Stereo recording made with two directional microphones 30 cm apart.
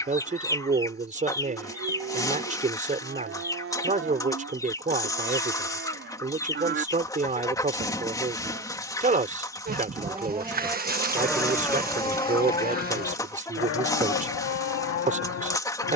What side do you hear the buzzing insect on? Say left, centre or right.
right.